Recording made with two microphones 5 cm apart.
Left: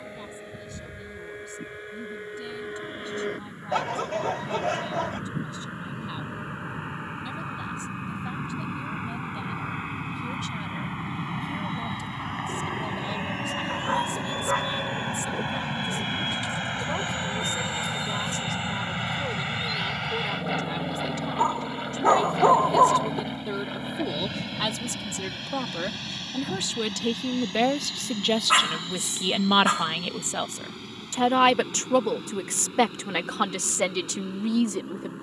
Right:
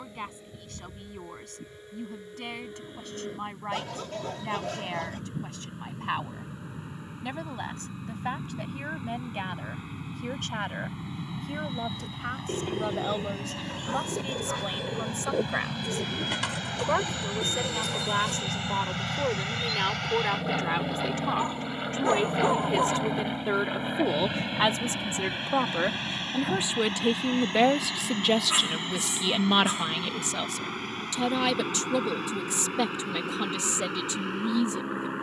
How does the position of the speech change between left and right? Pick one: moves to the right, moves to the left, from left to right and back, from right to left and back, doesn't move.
moves to the left.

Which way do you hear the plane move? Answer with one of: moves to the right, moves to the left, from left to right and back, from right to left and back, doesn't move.
moves to the right.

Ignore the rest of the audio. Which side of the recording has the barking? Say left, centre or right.
left.